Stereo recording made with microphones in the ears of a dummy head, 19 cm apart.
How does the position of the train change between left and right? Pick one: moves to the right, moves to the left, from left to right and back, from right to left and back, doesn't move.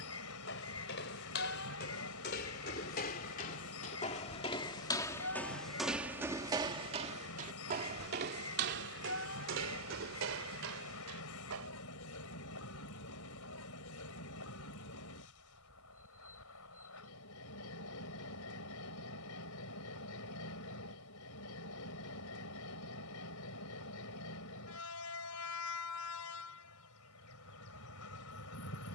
doesn't move.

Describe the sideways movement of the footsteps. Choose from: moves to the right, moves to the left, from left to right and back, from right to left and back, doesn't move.
moves to the right.